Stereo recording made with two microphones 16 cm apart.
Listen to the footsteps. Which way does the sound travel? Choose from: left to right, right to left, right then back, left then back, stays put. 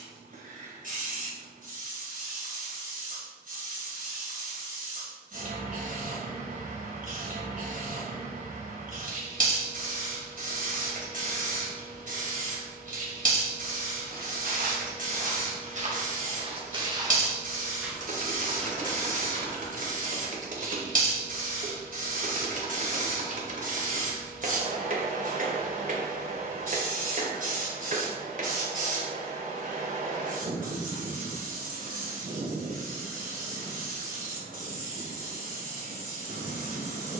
right to left.